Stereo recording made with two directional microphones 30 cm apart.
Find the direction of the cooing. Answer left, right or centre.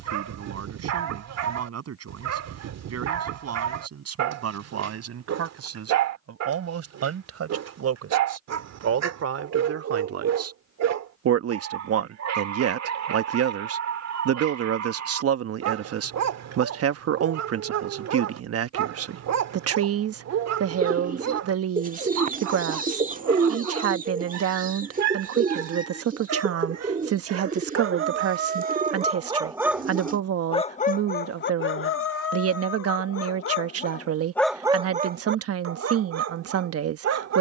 right.